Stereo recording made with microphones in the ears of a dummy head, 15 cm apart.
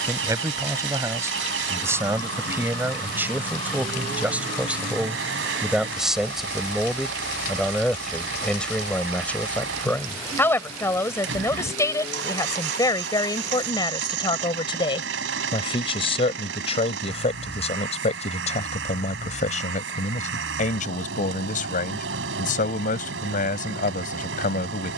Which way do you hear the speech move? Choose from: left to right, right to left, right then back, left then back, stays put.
right to left.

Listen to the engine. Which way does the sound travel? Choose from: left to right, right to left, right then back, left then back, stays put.
stays put.